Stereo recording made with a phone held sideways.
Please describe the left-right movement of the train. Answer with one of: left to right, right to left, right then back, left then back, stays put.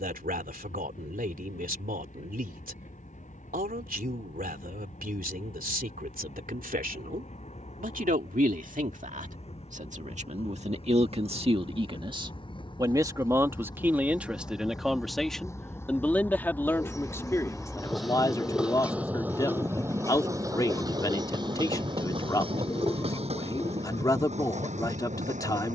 left to right.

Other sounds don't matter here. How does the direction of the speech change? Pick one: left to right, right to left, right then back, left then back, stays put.
right to left.